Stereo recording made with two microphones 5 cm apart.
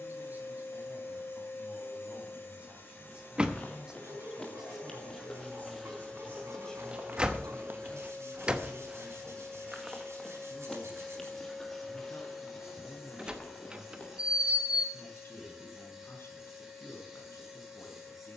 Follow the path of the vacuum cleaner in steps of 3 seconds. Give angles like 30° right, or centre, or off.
50° left, 40° left, 20° left, 10° left, 10° right, 10° right.